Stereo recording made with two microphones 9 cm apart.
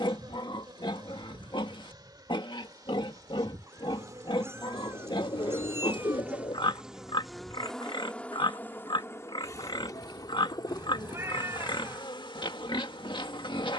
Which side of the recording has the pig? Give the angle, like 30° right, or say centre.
60° left.